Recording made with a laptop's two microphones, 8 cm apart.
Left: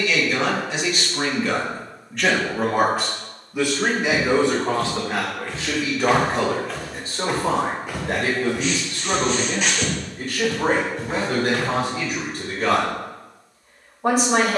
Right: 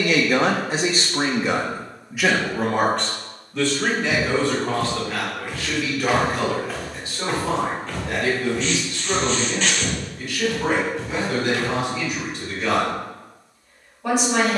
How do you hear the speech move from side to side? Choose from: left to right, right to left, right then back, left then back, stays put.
right to left.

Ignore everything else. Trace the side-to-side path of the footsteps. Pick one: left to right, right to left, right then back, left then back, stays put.
right to left.